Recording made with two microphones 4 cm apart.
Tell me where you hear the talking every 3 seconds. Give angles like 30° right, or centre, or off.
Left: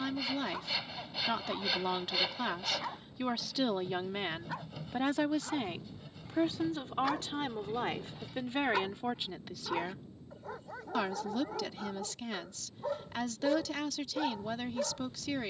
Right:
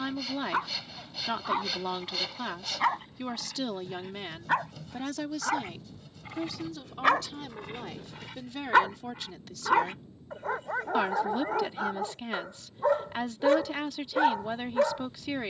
10° right, 20° left, 40° left, centre, 20° right.